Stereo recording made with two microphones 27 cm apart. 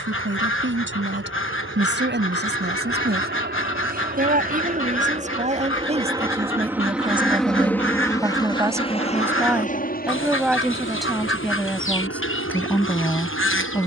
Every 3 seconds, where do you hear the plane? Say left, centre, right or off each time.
right, right, centre, left, left.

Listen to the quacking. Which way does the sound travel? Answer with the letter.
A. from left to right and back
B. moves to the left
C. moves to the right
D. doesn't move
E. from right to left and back
D.